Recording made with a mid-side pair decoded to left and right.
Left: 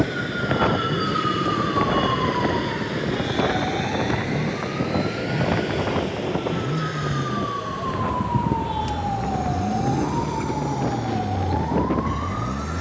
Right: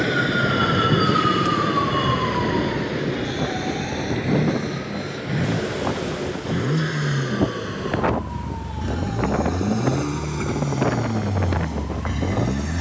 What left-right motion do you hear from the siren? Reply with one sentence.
In this clip you hear the siren move from right to left.